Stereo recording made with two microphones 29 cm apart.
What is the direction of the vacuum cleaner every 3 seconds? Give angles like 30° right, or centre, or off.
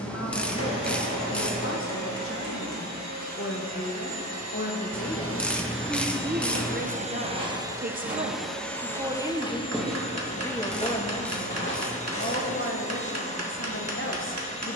80° right, 60° right, 20° right, 20° left, 20° left.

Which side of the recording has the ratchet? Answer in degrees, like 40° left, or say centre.
centre.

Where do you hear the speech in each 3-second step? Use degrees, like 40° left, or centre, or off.
50° left, 30° left, 30° right, 10° left, 40° left.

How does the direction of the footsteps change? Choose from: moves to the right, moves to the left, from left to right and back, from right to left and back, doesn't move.
moves to the left.